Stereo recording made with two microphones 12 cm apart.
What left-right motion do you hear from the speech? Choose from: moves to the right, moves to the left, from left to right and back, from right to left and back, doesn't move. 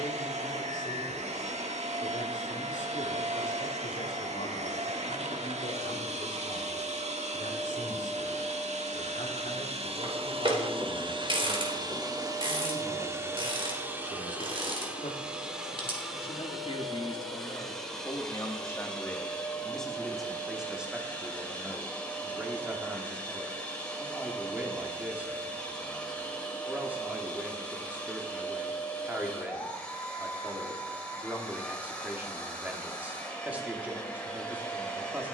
moves to the right.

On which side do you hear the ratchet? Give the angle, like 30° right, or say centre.
40° right.